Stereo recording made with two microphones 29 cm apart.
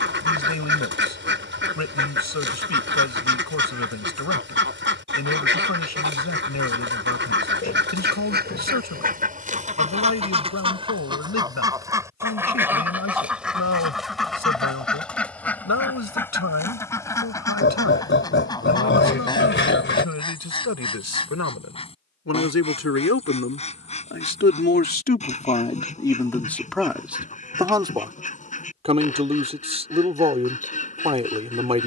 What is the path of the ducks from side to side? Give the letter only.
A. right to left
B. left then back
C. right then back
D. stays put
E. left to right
A.